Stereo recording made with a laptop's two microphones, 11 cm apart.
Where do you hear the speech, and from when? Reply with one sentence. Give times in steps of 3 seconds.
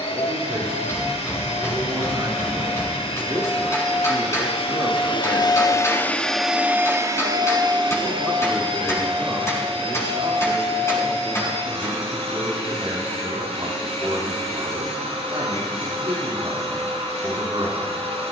You can hear the speech on the right from 0 s, in the centre from 6 s and on the right from 9 s.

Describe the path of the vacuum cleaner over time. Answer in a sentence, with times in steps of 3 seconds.
You can hear the vacuum cleaner on the left from 0 s and on the right from 6 s.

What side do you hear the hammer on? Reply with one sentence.
In this clip you hear the hammer on the left.